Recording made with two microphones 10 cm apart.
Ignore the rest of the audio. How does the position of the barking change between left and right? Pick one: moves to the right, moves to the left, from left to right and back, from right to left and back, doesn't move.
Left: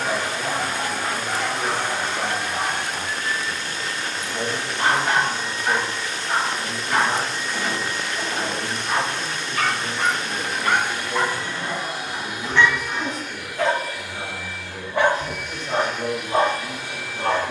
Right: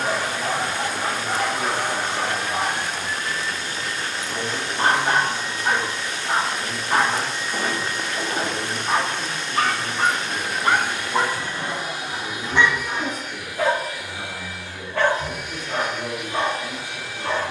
moves to the left.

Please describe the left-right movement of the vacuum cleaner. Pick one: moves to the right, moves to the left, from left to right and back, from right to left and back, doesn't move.
doesn't move.